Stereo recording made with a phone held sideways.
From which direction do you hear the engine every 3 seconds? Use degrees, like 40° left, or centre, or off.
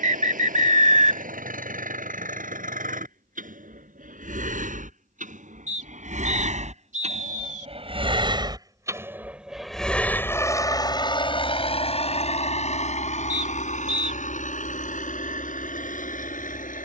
80° right, 70° right, 50° right, 20° left, 60° left, 70° left.